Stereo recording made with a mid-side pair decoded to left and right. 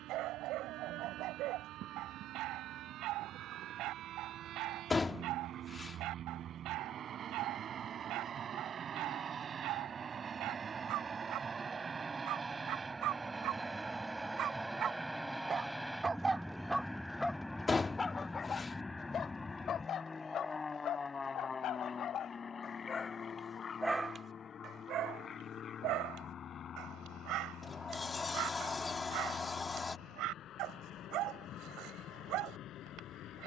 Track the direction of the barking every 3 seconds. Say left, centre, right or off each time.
right, right, right, right, right, centre, left, left, right, right, right.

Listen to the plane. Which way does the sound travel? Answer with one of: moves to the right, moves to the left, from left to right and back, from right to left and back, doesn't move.
moves to the left.